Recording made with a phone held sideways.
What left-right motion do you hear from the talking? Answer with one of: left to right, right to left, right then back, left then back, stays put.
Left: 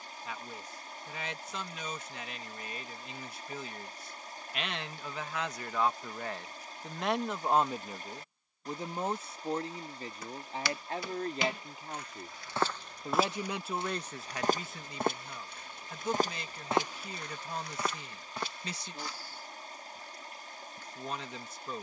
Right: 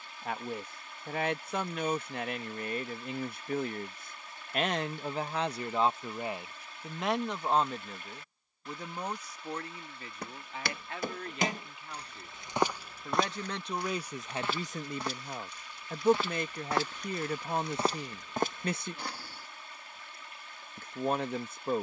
left then back.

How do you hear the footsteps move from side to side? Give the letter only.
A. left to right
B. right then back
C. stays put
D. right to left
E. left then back
E.